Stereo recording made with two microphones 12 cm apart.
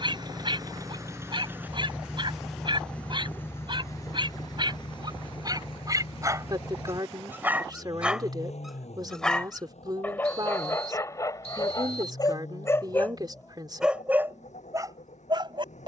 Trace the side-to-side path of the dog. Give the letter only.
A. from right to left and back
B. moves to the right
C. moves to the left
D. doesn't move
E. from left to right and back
A.